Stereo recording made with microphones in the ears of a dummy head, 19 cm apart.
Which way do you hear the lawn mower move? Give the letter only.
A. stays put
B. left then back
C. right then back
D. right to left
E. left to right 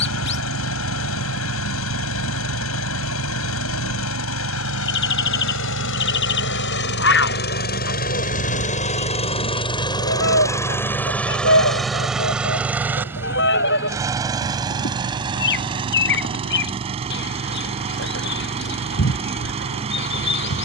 E.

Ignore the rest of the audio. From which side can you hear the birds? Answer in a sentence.
In this clip you hear the birds on the left.